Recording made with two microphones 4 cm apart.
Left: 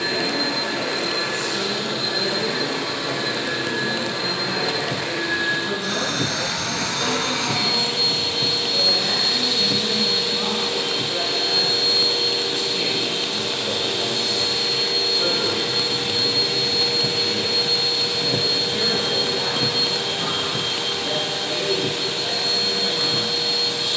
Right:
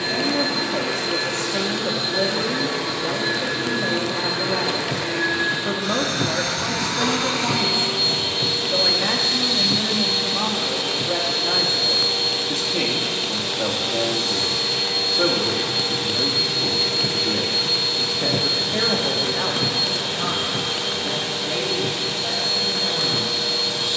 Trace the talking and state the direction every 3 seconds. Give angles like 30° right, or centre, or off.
80° right, 80° right, 80° right, 80° right, 80° right, 80° right, 40° right, centre.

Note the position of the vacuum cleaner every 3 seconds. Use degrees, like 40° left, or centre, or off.
40° left, 10° left, 10° right, 20° left, 30° left, 30° left, 30° left, 30° left.